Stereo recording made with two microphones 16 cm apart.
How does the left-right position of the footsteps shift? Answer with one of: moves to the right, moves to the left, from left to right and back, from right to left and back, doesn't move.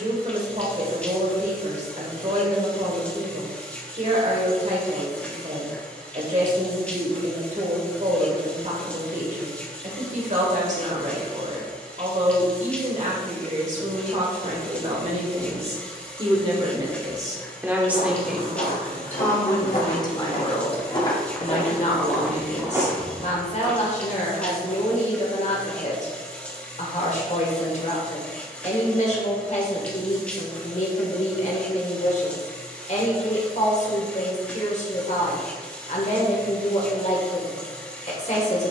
moves to the right.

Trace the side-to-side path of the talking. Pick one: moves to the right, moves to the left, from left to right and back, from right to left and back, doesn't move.
moves to the left.